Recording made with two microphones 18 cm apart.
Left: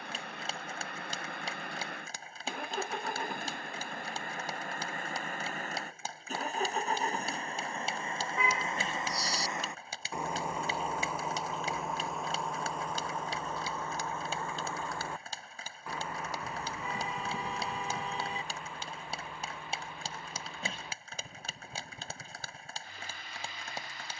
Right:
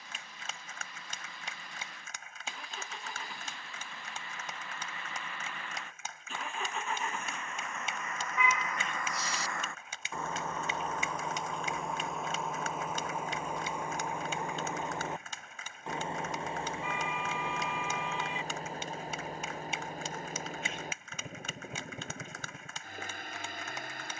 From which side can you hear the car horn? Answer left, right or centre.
left.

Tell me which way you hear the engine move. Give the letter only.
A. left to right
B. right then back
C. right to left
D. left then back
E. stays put
A.